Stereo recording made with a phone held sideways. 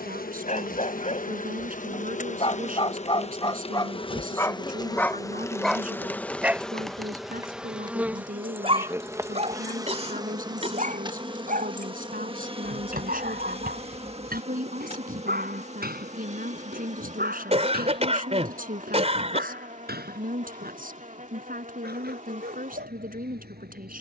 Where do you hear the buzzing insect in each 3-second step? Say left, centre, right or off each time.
left, left, centre, right, right, right, right, right.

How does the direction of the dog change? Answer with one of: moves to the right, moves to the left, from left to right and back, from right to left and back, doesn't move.
moves to the right.